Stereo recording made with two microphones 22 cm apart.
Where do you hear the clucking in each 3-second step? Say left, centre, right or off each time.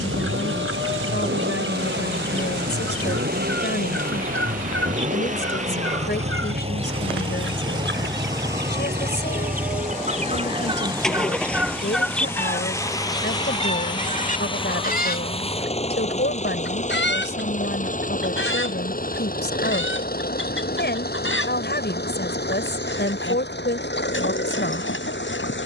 right, right, right, right, left, left, left, left, left.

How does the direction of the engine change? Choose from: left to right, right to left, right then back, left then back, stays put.
right to left.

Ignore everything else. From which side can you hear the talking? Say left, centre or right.
left.